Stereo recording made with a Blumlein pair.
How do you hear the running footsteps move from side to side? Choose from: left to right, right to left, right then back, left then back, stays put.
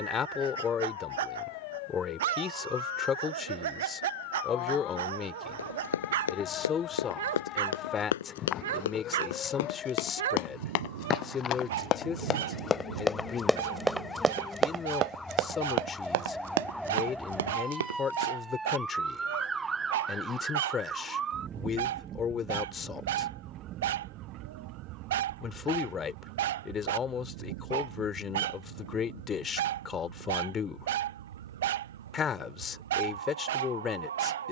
left to right.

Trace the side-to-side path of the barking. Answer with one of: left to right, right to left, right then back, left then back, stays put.
stays put.